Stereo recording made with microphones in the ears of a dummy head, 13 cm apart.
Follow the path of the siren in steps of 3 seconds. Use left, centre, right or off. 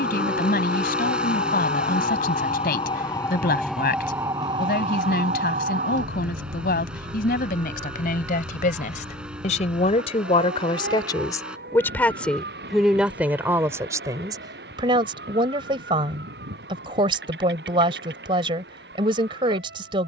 left, right, right, right, right, right, right.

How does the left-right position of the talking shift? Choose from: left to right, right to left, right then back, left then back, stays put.
left to right.